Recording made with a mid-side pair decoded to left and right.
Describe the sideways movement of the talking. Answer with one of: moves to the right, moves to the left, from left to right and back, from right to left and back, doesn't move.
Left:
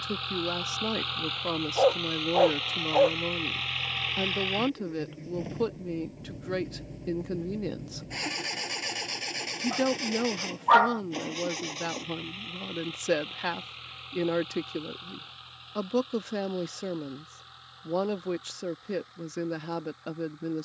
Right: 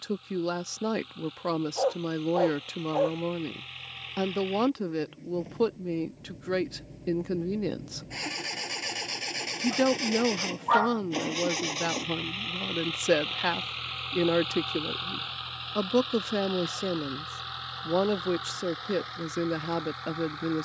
doesn't move.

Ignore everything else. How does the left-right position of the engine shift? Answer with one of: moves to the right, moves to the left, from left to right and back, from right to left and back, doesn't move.
moves to the right.